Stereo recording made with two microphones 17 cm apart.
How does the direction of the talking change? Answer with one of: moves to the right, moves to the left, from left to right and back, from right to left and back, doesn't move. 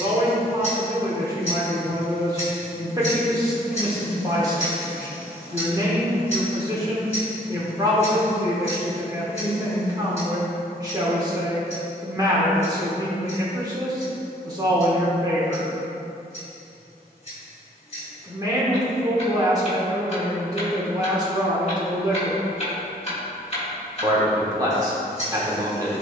doesn't move.